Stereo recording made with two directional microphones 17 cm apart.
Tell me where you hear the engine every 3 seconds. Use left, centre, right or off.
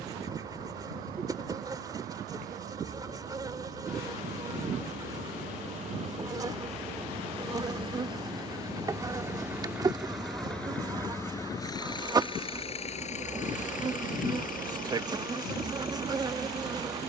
right, right, right, centre, left, left.